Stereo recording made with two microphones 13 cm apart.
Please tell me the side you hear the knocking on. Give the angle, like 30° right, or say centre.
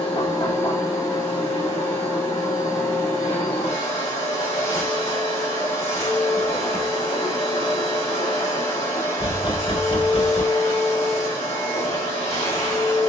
40° left.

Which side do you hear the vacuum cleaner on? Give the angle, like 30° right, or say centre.
50° left.